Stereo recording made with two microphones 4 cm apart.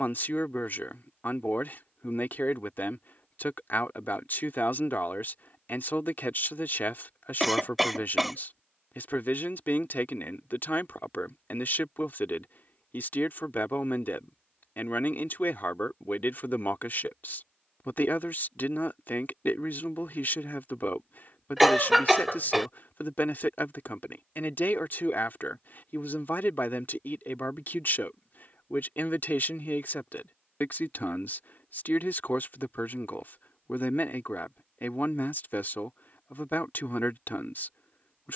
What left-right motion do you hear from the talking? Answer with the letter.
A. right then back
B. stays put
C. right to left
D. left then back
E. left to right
B.